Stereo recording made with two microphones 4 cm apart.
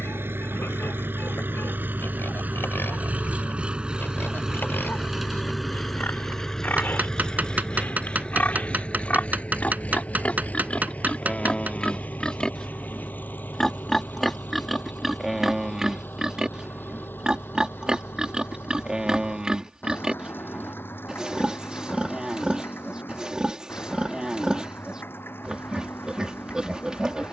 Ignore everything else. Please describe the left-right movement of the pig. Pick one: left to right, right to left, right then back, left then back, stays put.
left to right.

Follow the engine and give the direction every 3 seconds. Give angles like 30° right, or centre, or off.
50° right, 10° right, 20° left, 40° left, 50° left, 50° left, 60° left, 60° left, 60° left.